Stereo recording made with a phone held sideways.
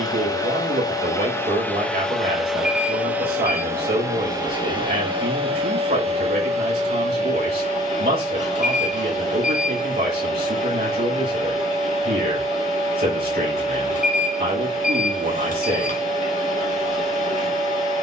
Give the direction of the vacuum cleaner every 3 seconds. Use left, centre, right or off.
centre, right, right, right, right, right.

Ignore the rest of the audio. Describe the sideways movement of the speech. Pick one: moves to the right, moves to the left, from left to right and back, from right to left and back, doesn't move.
doesn't move.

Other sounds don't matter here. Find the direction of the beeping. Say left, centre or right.
left.